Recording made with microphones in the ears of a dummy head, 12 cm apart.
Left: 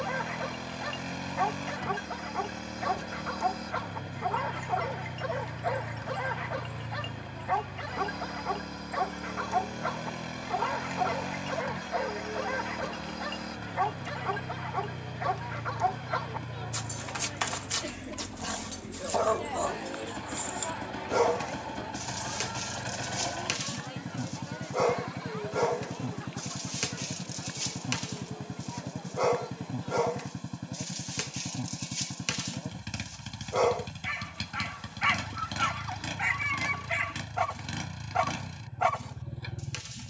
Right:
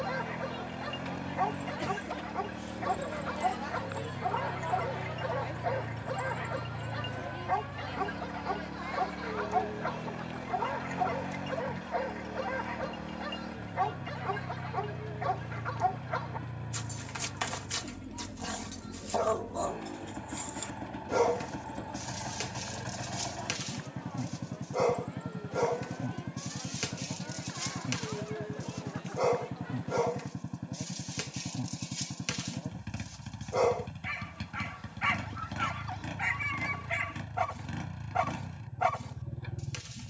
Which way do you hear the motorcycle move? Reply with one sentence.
In this clip you hear the motorcycle stay in one place.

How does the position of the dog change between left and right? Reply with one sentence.
In this clip you hear the dog stay put.